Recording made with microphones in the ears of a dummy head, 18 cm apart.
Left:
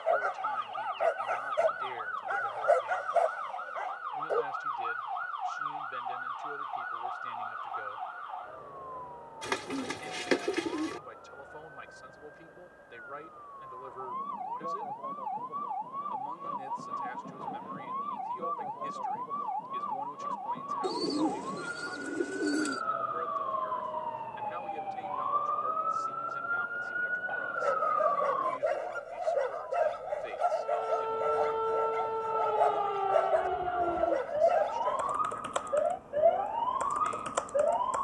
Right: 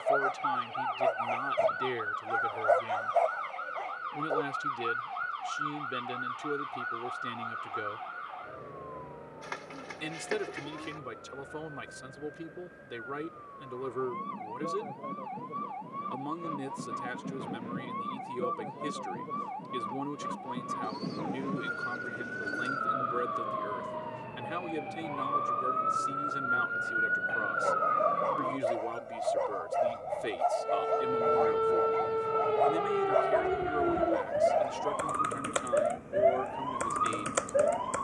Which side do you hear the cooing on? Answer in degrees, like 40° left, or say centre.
70° left.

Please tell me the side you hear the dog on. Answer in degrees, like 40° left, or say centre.
10° left.